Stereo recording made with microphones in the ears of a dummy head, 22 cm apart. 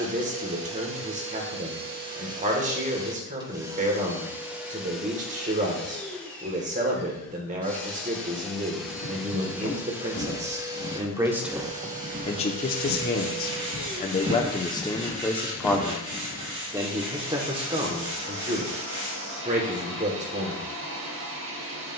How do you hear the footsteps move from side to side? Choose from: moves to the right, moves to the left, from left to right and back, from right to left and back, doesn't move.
from left to right and back.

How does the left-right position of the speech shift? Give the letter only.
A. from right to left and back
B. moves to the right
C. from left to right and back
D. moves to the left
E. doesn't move
A.